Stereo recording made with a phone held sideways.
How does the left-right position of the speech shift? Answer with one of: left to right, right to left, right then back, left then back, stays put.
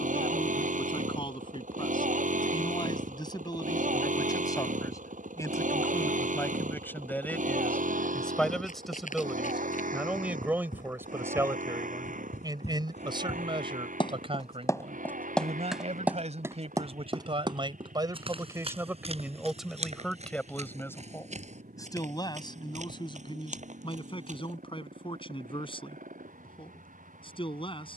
right then back.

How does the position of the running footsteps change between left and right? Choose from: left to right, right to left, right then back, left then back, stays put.
left to right.